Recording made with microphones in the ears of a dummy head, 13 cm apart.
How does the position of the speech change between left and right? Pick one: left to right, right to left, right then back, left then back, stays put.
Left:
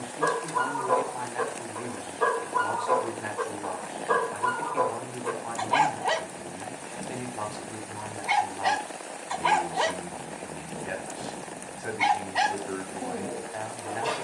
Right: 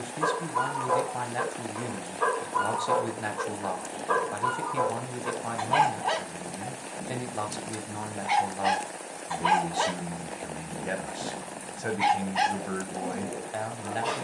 stays put.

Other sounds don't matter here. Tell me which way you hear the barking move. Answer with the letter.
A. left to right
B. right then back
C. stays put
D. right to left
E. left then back
C.